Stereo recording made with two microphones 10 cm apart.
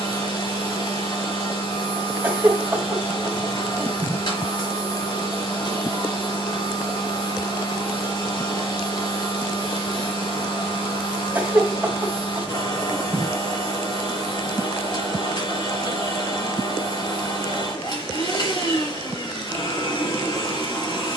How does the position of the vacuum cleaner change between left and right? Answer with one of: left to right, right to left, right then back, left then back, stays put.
stays put.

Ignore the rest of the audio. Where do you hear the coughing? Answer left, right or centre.
right.